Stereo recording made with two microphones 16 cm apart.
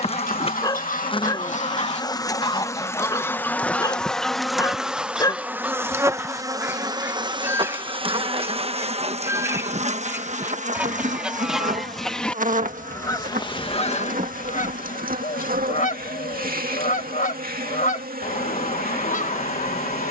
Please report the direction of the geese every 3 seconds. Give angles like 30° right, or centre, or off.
50° left, centre, 10° right, 10° right, 30° left, 50° left, 50° left.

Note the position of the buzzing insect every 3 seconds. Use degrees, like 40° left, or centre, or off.
30° left, centre, 30° right, 50° right, 60° right, 70° right, 70° right.